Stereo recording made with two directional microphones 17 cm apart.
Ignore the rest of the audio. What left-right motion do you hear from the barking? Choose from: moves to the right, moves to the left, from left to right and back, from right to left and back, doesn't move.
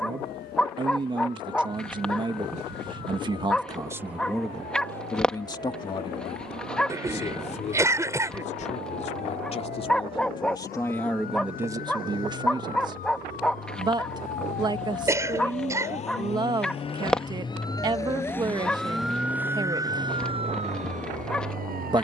doesn't move.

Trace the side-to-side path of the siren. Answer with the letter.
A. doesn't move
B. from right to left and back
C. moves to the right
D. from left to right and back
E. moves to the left
C.